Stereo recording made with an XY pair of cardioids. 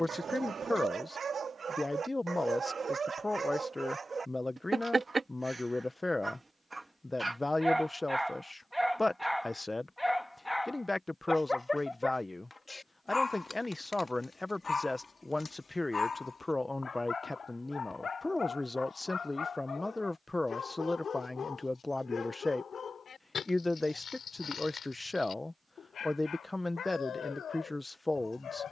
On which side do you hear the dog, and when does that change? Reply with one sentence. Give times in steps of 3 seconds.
You can hear the dog on the right from 0 s, in the centre from 6 s and on the left from 12 s.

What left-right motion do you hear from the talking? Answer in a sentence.
In this clip you hear the talking stay in one place.